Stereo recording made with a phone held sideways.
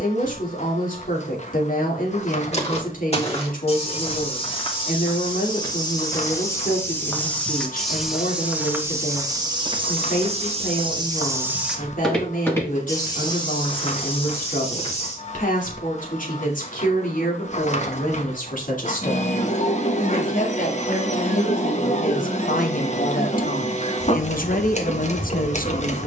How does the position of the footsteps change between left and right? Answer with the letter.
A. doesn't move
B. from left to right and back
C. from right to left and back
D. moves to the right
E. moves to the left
B.